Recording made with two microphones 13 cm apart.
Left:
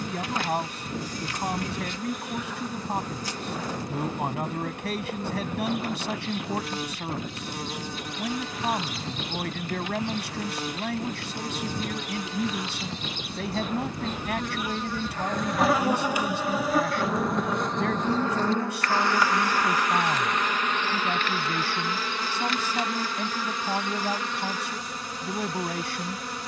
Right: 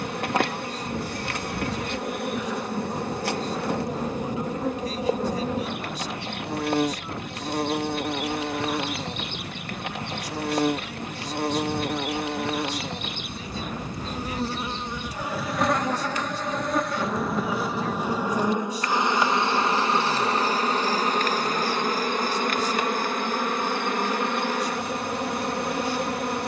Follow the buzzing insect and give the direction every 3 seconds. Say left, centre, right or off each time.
right, right, right, right, right, centre, right, right, right.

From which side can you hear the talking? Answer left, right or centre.
left.